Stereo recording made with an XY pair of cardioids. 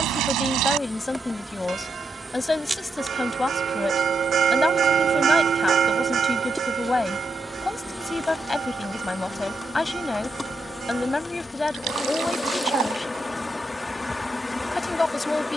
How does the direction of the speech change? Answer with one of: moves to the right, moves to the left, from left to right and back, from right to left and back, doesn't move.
doesn't move.